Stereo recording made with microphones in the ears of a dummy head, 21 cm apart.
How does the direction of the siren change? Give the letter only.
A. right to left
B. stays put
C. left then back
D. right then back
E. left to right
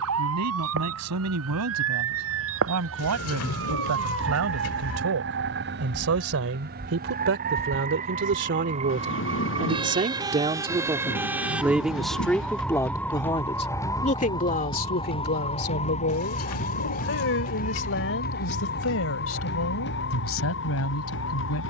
A.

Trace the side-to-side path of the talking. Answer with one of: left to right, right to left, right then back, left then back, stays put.
right to left.